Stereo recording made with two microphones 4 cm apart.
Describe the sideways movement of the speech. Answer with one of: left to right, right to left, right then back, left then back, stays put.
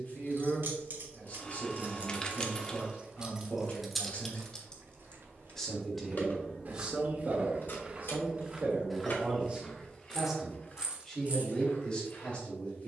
right then back.